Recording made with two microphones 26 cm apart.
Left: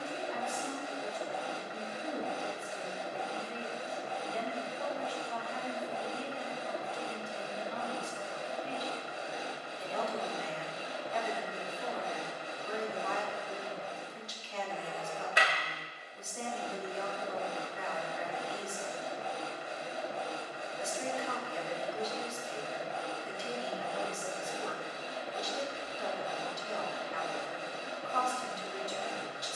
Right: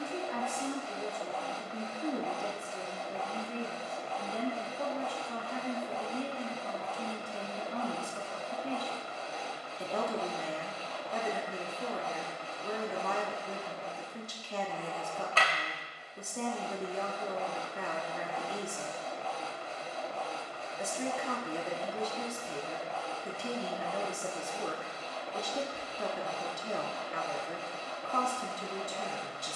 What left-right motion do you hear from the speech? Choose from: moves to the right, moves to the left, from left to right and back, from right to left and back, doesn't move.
doesn't move.